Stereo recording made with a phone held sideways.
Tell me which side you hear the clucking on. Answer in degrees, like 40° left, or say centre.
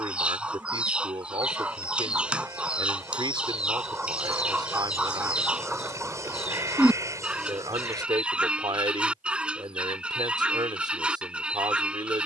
10° right.